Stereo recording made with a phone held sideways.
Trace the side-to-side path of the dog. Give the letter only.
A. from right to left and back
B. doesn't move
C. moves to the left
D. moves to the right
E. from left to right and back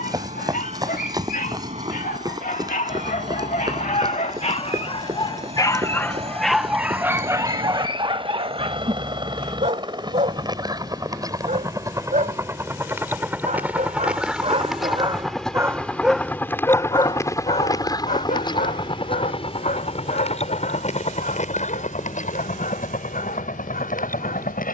E.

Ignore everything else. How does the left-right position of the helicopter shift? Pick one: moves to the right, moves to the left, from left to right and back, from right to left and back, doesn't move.
moves to the left.